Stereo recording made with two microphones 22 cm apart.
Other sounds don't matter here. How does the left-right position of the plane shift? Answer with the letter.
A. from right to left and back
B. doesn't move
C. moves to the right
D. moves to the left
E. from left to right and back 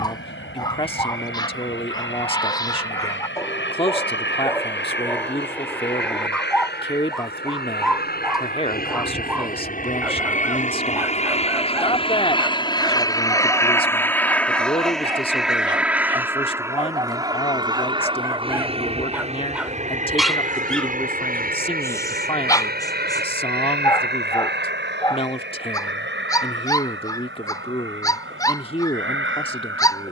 C.